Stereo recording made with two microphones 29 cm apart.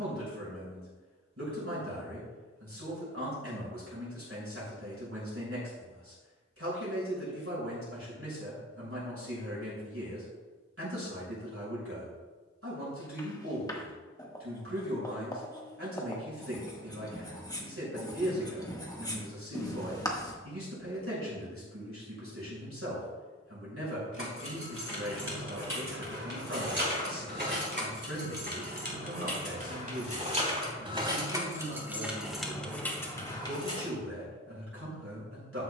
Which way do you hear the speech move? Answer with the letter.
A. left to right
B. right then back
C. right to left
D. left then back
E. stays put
E.